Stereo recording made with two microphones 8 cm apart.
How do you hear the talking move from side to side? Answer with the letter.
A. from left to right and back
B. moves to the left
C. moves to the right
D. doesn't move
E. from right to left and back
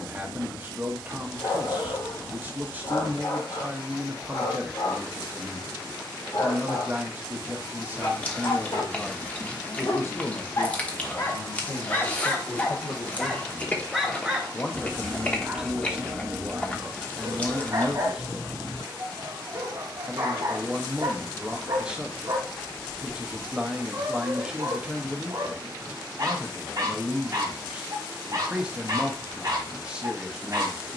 E.